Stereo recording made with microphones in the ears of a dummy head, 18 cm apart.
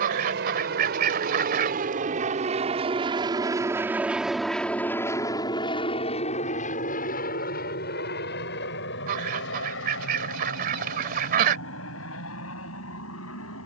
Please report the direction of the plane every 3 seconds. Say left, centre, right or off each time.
right, centre, left, left, left.